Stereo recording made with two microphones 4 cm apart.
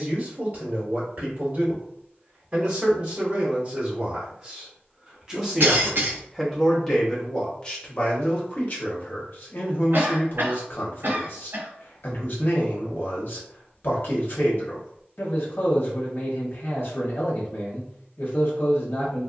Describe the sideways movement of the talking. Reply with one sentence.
In this clip you hear the talking move from right to left.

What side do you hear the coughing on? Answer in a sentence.
You can hear the coughing on the right.